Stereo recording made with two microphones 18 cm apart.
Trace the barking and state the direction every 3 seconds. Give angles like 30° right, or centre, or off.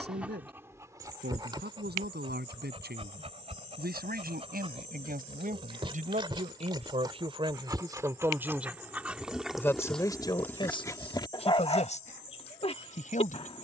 20° right, 30° right, 20° right, 10° left, 30° left.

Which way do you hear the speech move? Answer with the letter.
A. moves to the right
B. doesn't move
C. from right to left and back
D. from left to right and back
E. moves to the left
E.